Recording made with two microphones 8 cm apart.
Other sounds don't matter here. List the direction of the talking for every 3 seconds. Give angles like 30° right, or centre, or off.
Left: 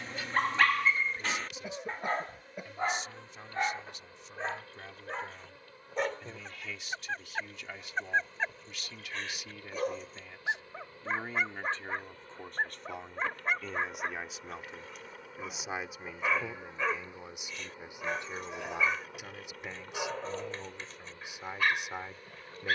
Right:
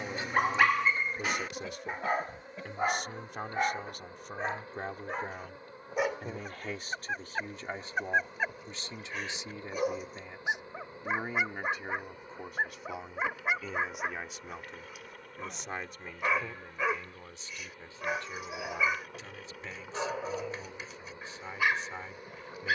60° right, 50° right, 40° right, 20° right, centre, 10° left, 20° left, 20° left.